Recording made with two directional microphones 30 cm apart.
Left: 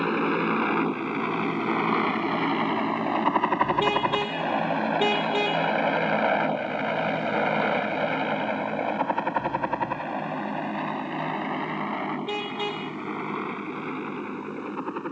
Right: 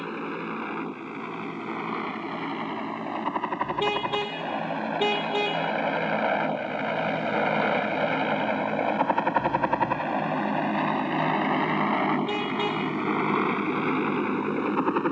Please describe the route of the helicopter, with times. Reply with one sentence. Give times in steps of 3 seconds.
You can hear the helicopter on the left from 0 s, in the centre from 6 s and on the right from 9 s.